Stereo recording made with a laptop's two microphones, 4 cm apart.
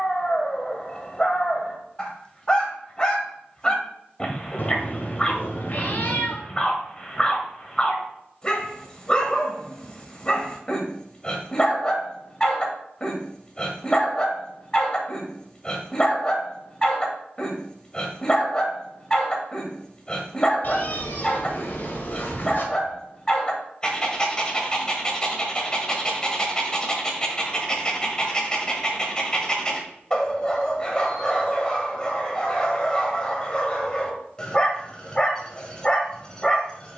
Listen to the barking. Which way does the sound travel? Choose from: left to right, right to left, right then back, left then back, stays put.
stays put.